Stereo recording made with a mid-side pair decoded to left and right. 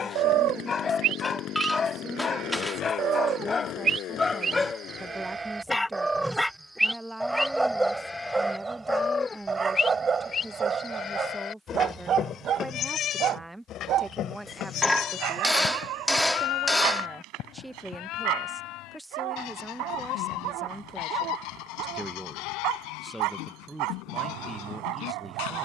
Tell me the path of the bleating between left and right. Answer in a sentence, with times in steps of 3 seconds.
You can hear the bleating on the right from 0 s, in the centre from 6 s and on the left from 9 s.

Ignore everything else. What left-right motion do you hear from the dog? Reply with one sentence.
You can hear the dog move to the right.